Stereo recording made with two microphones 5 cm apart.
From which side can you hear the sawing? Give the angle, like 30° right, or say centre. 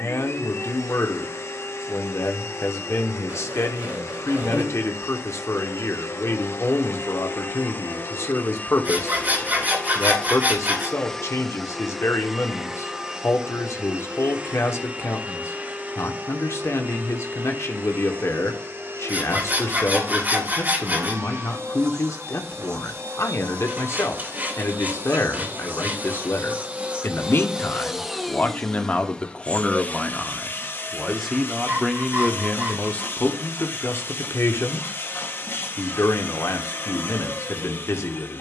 30° right.